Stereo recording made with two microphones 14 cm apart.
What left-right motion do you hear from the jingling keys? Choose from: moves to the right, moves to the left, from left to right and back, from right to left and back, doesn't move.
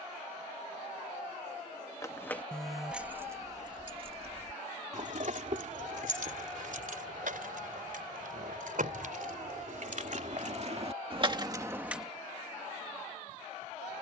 from left to right and back.